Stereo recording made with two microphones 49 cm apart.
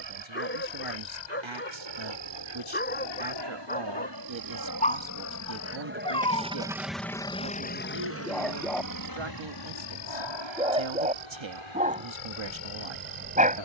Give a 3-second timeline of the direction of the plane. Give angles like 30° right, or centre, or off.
70° right, 40° right, 10° left, 50° left, 60° left.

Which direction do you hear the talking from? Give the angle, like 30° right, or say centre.
60° right.